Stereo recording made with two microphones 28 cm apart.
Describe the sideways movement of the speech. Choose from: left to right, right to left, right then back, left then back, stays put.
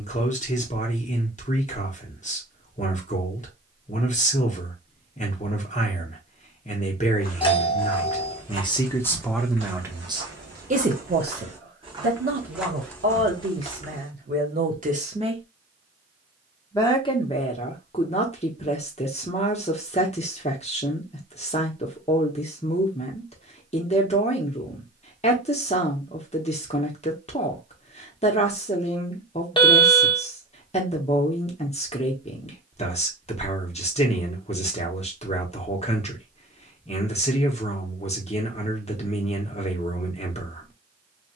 right then back.